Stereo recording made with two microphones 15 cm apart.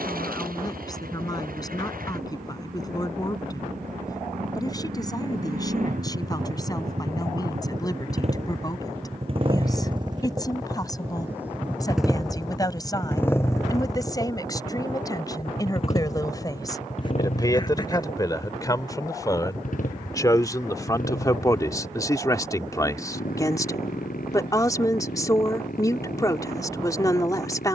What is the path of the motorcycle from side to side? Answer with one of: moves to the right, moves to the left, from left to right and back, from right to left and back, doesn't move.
moves to the left.